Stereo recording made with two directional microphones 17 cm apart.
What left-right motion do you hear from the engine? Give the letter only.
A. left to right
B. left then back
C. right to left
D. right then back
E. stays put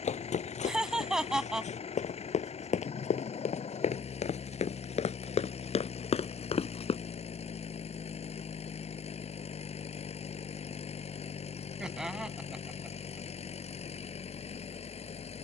E.